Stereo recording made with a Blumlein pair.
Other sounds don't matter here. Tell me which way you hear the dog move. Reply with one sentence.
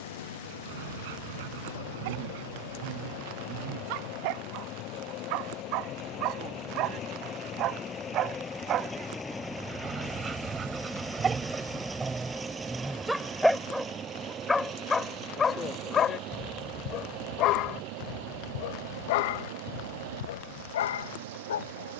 In this clip you hear the dog move from right to left.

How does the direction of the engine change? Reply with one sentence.
You can hear the engine move from left to right.